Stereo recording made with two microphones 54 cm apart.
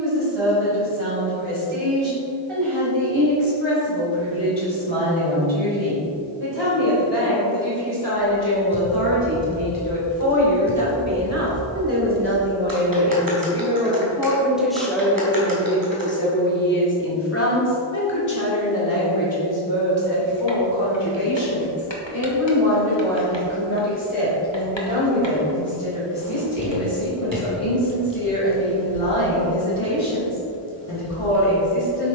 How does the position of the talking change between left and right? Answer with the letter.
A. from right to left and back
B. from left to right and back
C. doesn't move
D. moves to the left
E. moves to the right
D.